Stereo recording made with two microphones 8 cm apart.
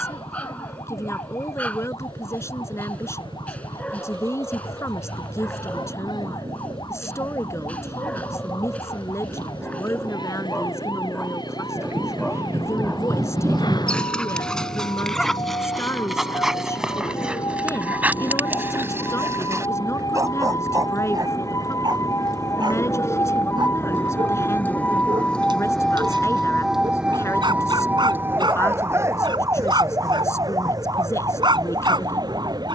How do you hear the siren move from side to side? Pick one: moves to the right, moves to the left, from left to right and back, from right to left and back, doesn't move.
moves to the right.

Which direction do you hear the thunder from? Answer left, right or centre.
right.